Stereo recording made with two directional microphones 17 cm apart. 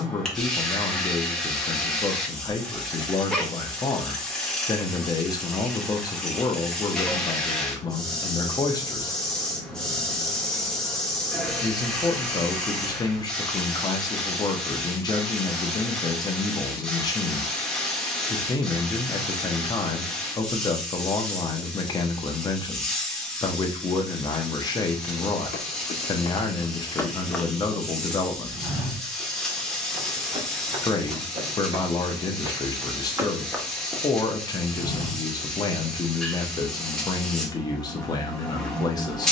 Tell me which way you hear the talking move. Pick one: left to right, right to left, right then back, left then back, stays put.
stays put.